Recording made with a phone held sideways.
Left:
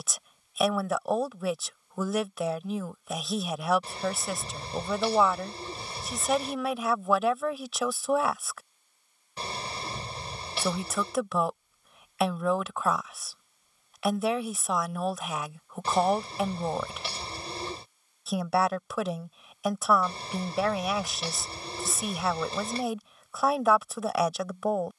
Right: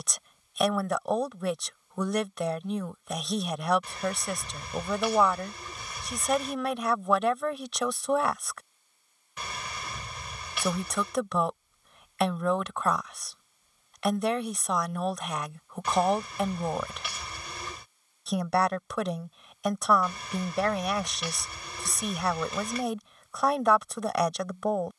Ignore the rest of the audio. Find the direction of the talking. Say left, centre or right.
centre.